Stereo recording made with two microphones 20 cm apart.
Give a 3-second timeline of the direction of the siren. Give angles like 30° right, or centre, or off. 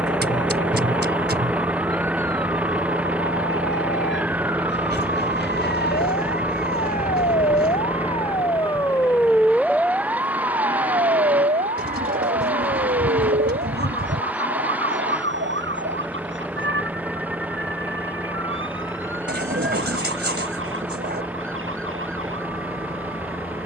70° left, 60° left, 40° left, 20° right, 50° right, 70° right, 70° right, 80° right.